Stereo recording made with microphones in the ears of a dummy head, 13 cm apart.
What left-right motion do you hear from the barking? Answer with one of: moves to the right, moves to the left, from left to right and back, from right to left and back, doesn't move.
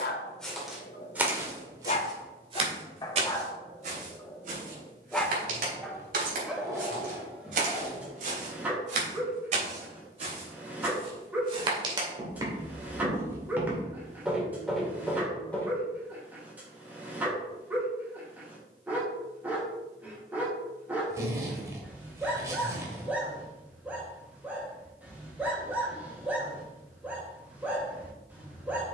moves to the right.